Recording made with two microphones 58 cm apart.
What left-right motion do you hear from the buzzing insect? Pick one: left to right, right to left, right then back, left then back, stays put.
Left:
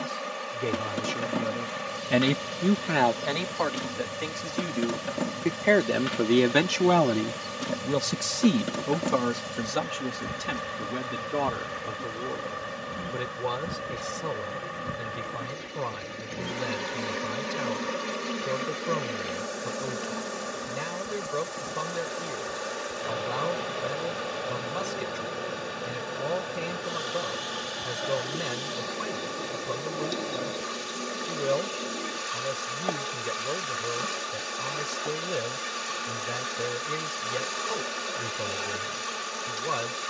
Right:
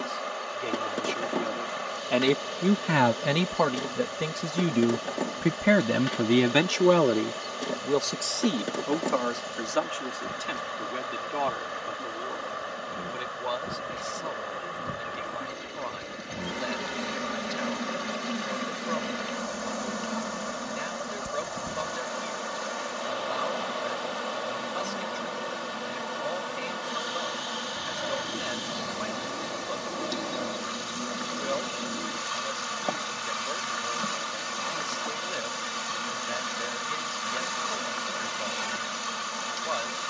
left to right.